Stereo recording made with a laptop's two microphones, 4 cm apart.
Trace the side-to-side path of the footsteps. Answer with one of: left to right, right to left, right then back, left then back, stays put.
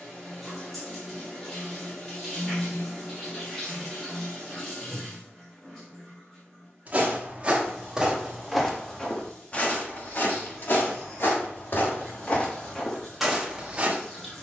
left then back.